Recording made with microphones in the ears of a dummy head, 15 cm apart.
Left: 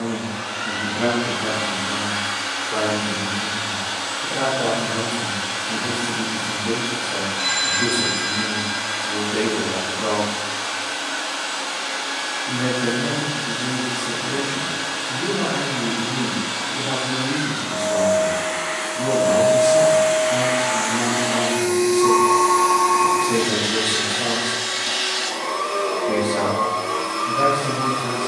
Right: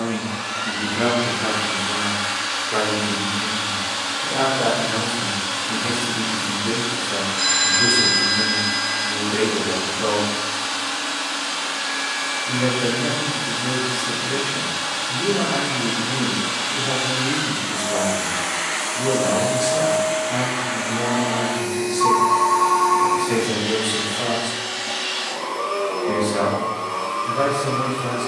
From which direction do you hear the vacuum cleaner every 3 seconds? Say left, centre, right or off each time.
right, right, right, right, right, right, centre, left, left, left.